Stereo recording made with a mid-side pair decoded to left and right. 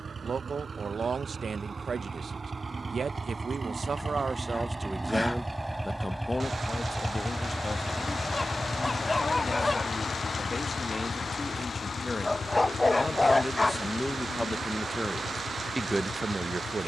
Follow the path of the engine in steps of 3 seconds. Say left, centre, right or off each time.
right, right, centre, left, left, left.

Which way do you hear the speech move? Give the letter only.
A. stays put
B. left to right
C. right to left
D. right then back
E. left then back
E.